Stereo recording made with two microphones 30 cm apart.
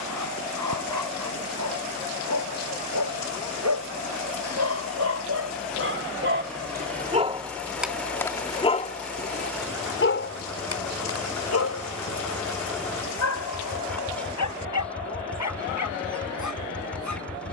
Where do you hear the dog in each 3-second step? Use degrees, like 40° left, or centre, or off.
80° right, 60° right, 10° right, 50° left, 70° left, 70° left.